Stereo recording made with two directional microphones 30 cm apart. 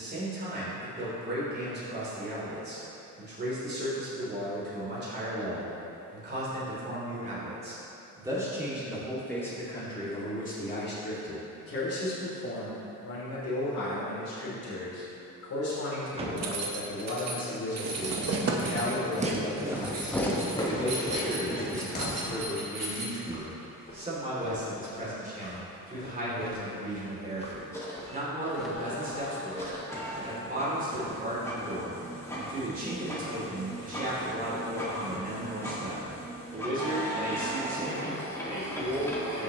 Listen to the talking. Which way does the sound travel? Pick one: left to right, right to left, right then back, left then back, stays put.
left then back.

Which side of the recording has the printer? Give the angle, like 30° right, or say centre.
10° left.